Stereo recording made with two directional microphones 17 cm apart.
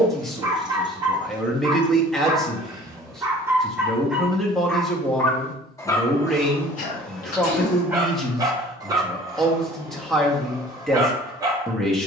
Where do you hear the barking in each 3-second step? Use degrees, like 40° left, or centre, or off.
20° right, centre, centre, 20° right.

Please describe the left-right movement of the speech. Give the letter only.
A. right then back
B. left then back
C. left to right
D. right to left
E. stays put
E.